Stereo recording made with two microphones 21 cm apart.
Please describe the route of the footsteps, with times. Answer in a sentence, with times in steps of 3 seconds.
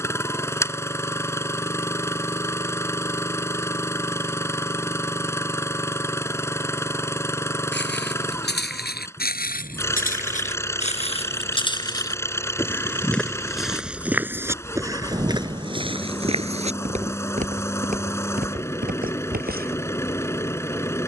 You can hear the footsteps not at all from 0 s, on the left from 6 s, in the centre from 12 s and on the right from 15 s.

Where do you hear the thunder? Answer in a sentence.
You can hear the thunder on the right.